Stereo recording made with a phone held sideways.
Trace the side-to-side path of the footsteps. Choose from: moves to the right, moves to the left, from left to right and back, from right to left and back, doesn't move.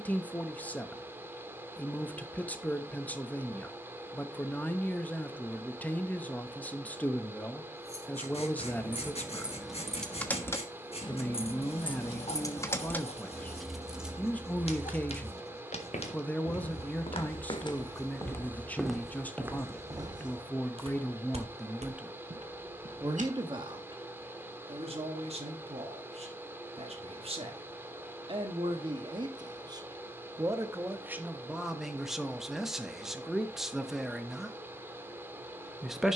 moves to the right.